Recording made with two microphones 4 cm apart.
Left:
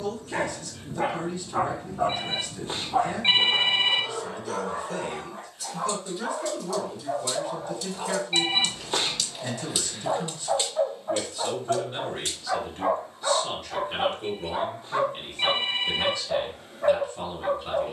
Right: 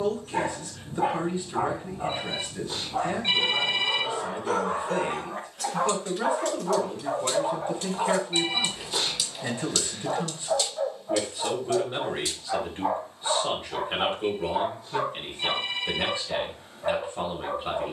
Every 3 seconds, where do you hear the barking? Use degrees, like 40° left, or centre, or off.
50° left, 30° right, 40° right, 20° left, 60° left, 60° left.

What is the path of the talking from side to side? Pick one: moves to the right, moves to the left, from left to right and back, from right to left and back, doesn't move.
doesn't move.